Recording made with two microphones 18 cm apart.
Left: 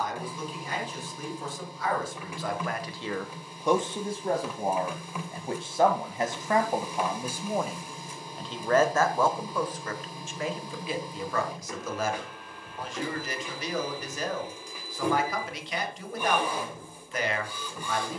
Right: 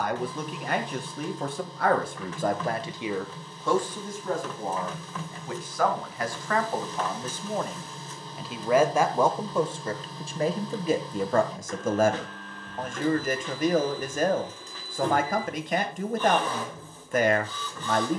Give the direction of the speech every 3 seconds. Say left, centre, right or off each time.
right, left, centre, right, right, right.